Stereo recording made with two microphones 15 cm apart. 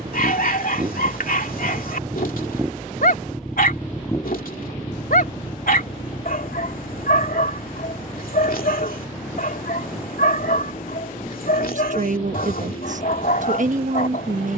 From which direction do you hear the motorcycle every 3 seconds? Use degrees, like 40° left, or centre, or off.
30° right, 20° left, 60° left, 70° left, 80° left.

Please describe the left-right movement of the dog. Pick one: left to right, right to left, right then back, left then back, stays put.
stays put.